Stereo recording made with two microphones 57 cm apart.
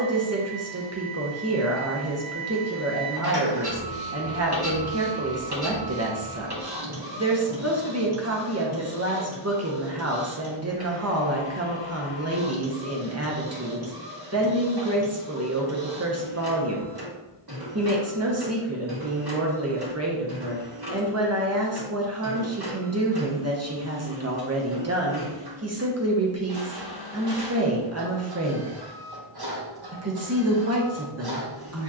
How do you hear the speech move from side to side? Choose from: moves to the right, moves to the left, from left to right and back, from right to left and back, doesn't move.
doesn't move.